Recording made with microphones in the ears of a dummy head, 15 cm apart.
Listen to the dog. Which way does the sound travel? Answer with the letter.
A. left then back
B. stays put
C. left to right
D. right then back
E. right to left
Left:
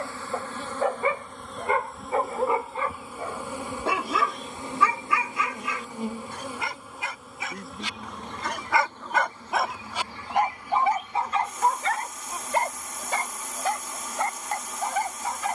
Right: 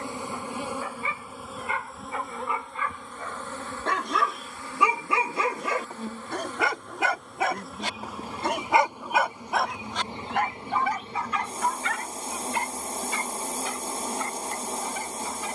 D.